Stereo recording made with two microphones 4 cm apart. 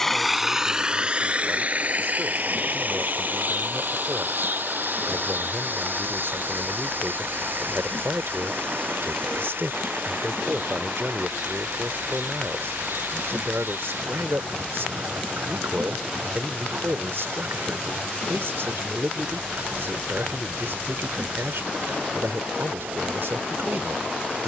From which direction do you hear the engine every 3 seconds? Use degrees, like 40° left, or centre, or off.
30° right, 50° right, 60° right, 60° right, 60° right, 60° right, 60° right, 60° right.